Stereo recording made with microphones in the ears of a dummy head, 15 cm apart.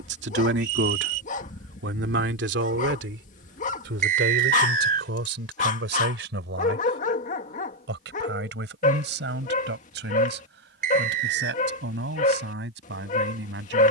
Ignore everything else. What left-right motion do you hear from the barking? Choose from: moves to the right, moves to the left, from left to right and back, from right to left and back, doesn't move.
doesn't move.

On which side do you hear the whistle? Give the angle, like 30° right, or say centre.
50° right.